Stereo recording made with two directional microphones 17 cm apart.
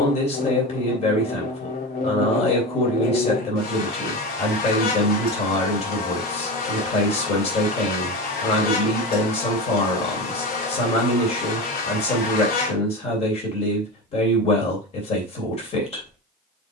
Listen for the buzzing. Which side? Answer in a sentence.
In this clip you hear the buzzing on the left.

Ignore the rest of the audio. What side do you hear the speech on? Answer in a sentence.
In this clip you hear the speech on the left.